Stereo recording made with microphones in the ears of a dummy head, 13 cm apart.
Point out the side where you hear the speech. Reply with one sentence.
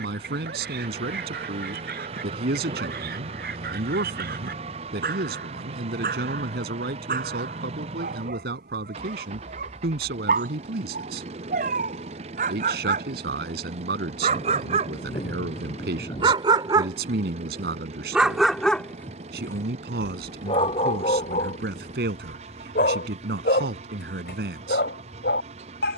In this clip you hear the speech on the right.